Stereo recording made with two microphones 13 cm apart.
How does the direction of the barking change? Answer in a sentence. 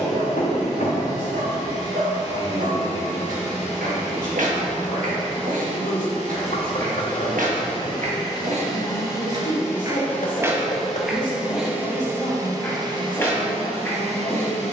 You can hear the barking travel towards the left.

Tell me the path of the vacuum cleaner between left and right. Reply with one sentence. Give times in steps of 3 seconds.
You can hear the vacuum cleaner on the left from 0 s, in the centre from 9 s and on the right from 12 s.